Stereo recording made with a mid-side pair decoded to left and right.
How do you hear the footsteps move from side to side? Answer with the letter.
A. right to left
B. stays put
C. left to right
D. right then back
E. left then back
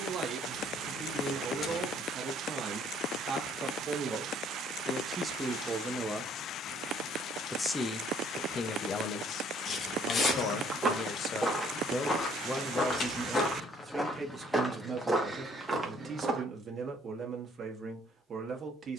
E.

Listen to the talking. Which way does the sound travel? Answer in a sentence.
You can hear the talking go left and come back.